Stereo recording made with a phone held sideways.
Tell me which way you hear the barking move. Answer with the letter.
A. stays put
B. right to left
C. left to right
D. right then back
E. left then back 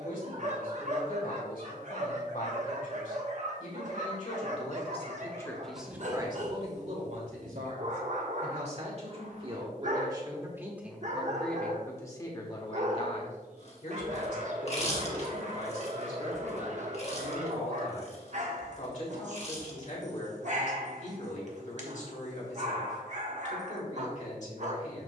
A.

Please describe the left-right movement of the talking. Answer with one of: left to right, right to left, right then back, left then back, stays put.
right then back.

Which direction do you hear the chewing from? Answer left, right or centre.
left.